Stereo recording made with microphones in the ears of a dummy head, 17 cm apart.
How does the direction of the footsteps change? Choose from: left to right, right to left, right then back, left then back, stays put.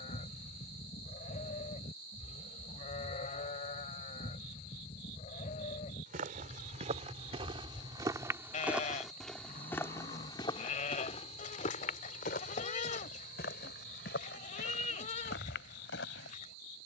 right to left.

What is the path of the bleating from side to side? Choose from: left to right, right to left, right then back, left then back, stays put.
stays put.